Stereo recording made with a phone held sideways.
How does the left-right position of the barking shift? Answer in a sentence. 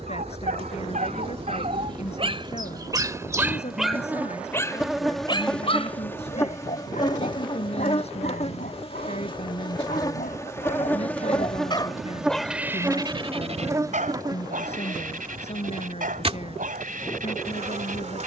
In this clip you hear the barking move from right to left and back again.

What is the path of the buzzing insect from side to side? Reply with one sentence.
You can hear the buzzing insect go left and come back.